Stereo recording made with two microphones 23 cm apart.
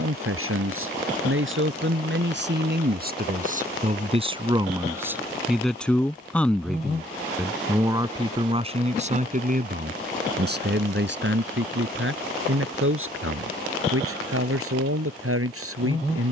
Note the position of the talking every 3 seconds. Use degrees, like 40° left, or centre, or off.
60° right, 20° right, 10° right, 50° right, 70° right, 70° right.